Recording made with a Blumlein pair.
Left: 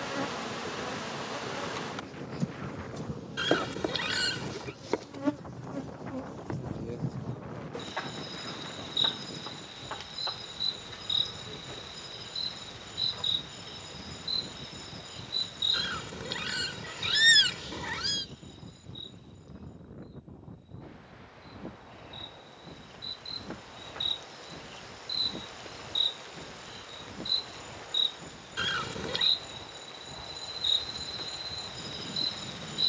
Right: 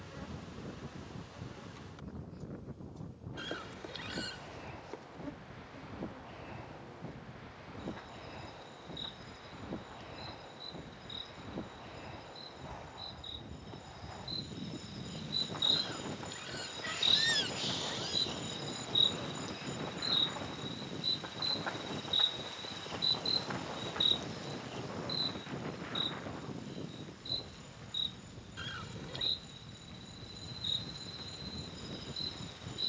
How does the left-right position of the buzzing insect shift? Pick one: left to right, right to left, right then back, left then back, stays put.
right then back.